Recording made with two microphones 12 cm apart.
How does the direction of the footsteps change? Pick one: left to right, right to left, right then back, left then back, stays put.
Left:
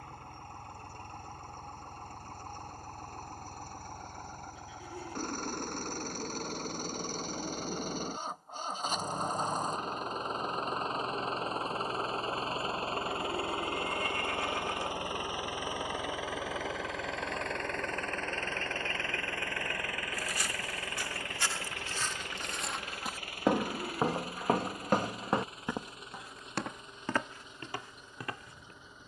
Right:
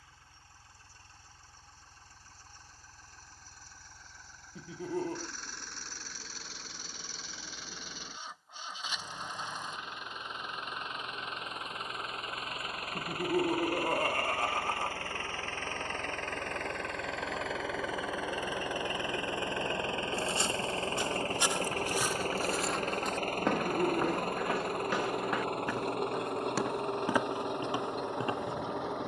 left then back.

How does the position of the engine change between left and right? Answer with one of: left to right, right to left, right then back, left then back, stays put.
left to right.